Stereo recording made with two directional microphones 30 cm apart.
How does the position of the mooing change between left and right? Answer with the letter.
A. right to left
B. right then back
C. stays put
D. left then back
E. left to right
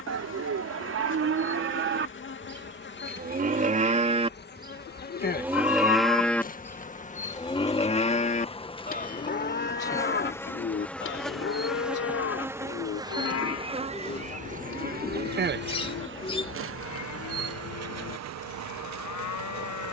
A.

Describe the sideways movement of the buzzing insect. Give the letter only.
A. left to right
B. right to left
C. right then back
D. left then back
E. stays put
A.